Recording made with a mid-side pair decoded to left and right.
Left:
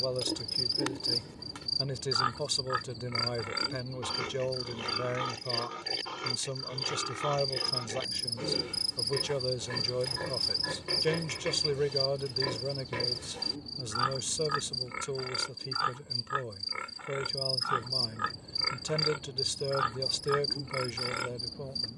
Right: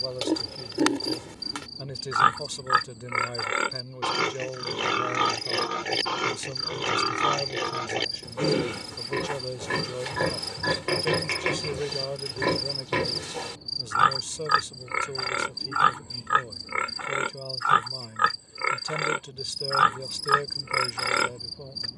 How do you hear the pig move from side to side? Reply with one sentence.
In this clip you hear the pig stay in one place.